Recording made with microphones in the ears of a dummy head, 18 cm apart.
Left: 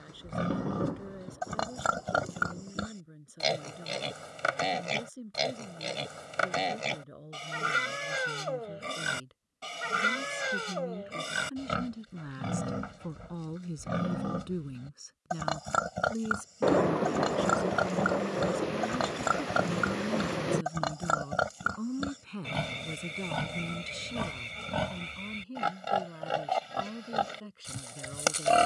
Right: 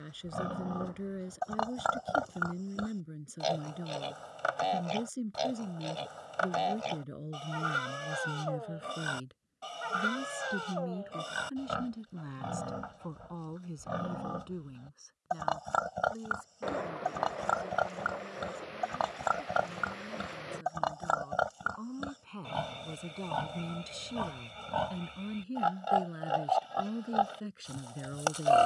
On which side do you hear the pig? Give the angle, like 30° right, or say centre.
30° left.